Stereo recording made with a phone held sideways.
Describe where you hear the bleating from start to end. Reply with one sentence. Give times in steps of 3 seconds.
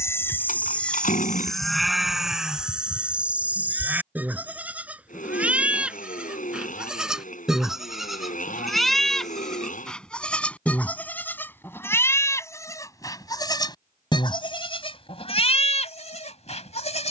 You can hear the bleating in the centre from 0 s and on the left from 12 s.